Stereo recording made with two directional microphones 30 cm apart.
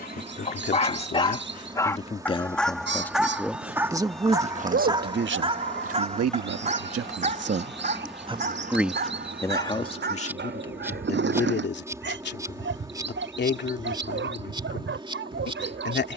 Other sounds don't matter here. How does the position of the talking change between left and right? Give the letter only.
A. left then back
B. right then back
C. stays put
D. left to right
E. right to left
B.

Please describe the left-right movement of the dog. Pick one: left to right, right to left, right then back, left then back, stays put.
left to right.